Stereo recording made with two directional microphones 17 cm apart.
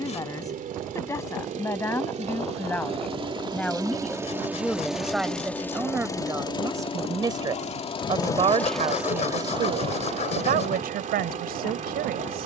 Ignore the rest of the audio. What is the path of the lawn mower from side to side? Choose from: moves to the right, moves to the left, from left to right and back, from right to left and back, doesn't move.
from right to left and back.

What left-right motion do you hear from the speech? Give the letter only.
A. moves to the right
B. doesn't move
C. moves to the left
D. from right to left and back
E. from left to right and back
A.